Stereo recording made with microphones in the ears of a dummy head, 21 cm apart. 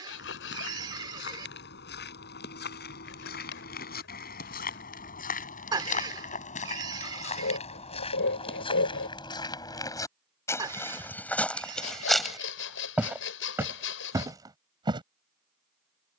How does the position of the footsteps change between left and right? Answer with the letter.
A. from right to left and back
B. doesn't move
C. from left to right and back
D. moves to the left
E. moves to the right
E.